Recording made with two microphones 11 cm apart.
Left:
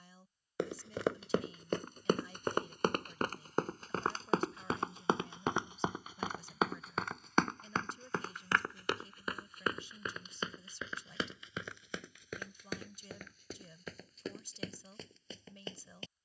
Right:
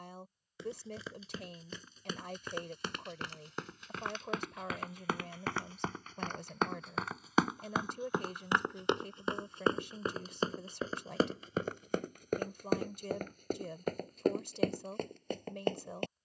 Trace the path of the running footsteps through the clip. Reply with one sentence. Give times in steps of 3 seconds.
You can hear the running footsteps on the left from 0 s, in the centre from 6 s and on the right from 9 s.